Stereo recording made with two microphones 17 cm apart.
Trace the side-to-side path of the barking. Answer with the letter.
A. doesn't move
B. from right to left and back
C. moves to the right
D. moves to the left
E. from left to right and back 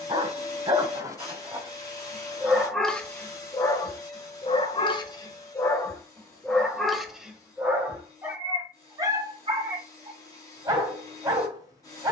B.